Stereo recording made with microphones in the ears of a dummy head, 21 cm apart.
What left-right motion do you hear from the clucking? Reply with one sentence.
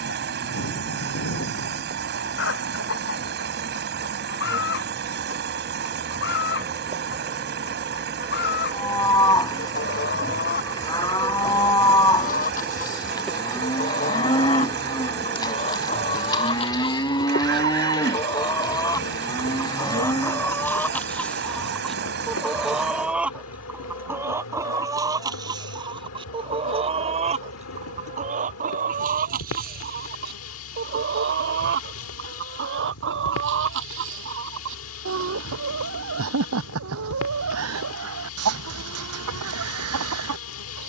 In this clip you hear the clucking move to the right.